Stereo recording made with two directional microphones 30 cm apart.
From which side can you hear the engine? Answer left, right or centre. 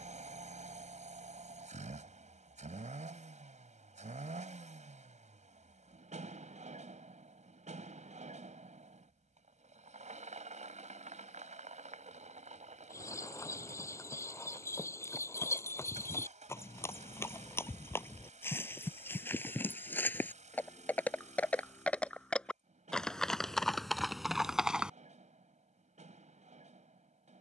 right.